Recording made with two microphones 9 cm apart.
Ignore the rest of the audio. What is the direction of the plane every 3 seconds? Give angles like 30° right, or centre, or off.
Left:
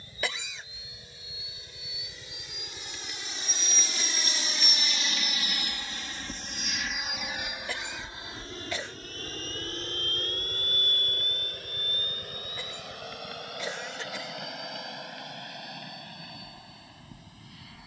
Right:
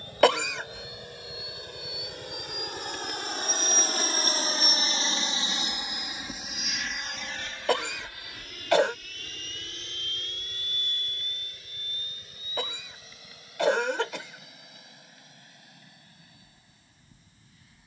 70° right, 40° right, 10° left, 40° left, 50° left, 60° left.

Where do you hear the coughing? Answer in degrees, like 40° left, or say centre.
70° right.